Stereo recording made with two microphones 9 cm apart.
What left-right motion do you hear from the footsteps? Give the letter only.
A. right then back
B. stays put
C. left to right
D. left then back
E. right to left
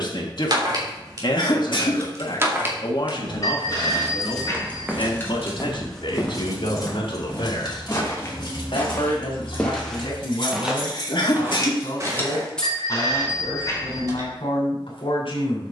D.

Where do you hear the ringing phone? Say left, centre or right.
left.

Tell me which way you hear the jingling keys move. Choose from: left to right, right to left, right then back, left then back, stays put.
left then back.